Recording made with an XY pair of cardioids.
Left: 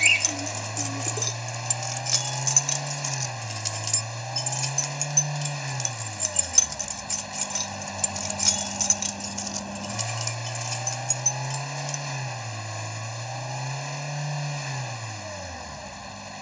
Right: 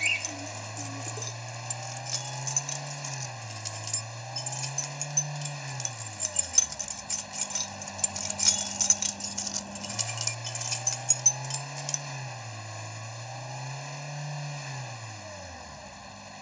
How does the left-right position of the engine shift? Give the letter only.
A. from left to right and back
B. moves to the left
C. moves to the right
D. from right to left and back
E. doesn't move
E.